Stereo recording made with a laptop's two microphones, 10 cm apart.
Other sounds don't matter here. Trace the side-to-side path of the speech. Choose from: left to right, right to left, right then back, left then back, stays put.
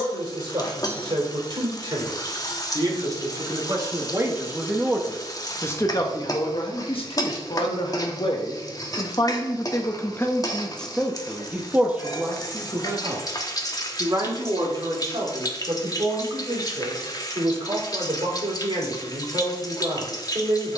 left then back.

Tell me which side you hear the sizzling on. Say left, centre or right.
left.